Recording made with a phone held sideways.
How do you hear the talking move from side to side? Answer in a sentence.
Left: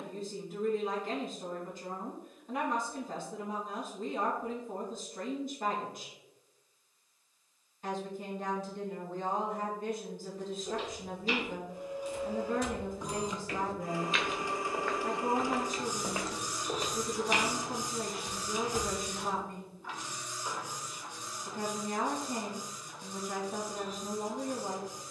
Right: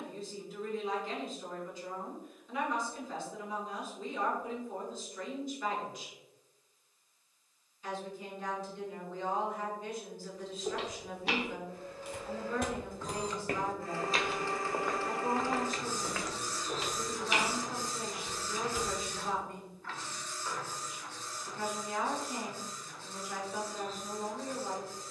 In this clip you hear the talking stay put.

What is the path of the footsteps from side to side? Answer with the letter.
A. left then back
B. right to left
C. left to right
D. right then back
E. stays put
B.